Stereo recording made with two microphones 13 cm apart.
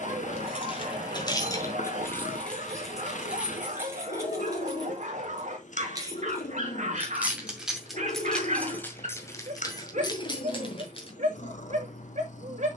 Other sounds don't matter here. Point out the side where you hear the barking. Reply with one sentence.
In this clip you hear the barking on the right.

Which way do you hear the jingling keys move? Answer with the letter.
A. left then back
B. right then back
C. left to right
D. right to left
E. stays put
B.